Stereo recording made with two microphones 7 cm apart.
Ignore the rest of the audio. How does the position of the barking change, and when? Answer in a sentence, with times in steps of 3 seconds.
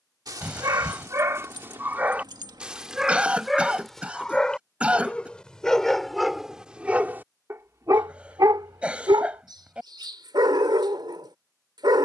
In this clip you hear the barking on the right from 0 s, in the centre from 3 s and on the right from 6 s.